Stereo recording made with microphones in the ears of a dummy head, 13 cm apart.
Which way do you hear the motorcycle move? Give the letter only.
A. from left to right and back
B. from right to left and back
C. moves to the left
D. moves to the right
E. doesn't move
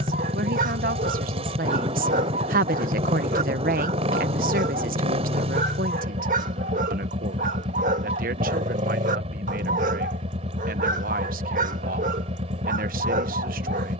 E.